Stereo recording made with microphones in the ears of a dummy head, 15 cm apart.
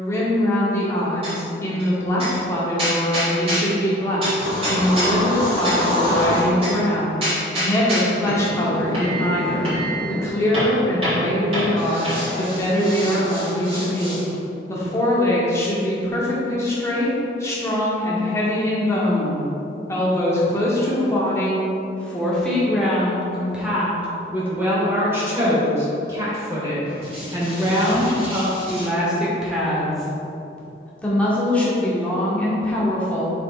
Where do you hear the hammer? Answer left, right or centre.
right.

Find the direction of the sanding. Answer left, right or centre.
right.